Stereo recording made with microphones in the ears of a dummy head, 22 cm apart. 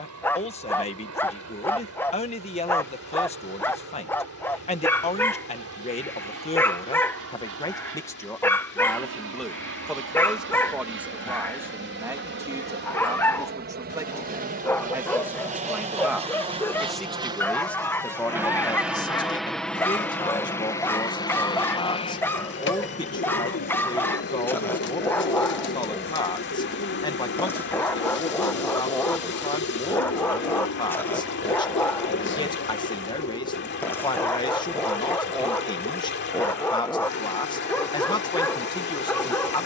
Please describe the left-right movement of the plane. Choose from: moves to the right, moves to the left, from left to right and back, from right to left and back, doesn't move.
moves to the left.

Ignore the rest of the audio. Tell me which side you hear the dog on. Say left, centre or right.
centre.